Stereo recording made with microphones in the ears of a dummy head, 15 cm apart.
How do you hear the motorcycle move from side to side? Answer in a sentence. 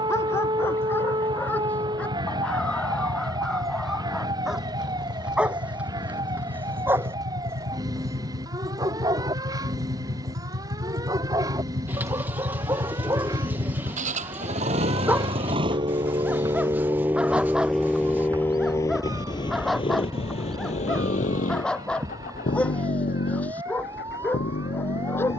You can hear the motorcycle go from the right side to the left.